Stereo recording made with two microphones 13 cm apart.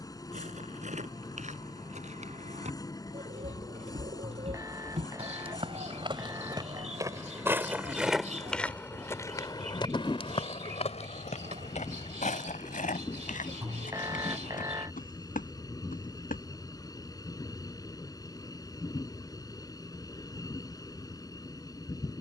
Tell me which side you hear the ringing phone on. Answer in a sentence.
You can hear the ringing phone on the right.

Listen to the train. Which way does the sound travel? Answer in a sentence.
In this clip you hear the train stay put.